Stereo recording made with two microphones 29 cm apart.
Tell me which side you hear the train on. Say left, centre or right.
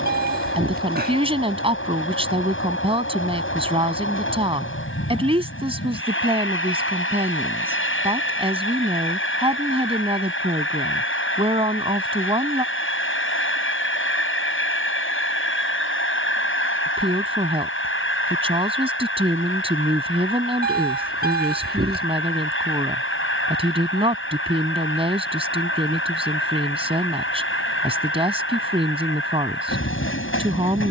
left.